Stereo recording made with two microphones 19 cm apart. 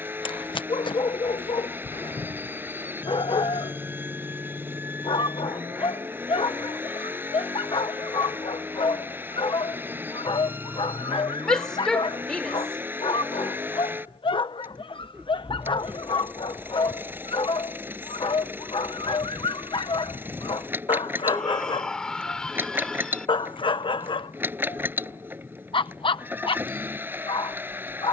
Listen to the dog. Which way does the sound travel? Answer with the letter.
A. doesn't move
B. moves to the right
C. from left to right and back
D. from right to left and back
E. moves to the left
A.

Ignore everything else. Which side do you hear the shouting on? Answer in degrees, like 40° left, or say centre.
centre.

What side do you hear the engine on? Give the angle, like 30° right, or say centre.
10° right.